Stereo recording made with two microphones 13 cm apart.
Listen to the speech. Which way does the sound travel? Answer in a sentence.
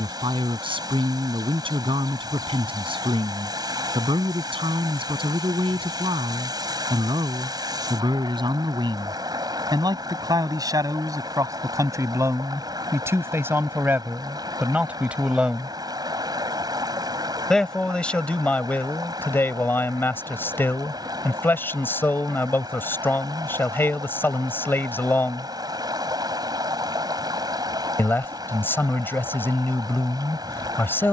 In this clip you hear the speech move to the left.